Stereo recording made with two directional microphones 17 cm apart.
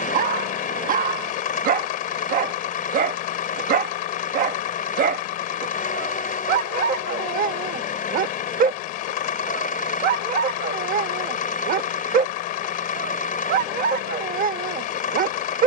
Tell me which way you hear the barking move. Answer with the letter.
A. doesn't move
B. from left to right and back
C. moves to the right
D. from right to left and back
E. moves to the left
A.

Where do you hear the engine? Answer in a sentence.
In this clip you hear the engine on the left.